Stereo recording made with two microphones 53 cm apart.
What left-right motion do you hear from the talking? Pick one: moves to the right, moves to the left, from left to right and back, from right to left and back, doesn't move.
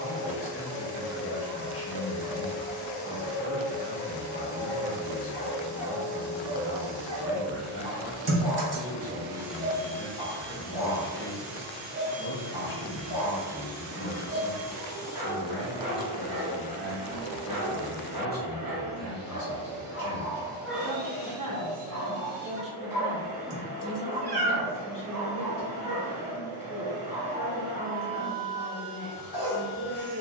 from left to right and back.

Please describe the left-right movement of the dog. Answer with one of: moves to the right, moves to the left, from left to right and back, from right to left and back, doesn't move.
from left to right and back.